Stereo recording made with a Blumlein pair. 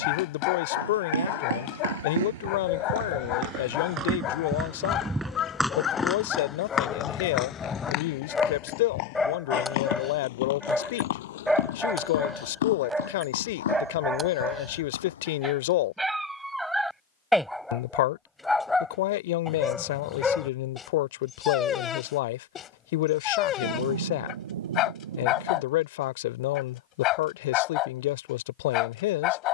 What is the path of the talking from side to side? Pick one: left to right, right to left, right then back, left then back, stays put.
stays put.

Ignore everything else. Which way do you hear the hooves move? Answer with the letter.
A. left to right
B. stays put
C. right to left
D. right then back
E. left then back
C.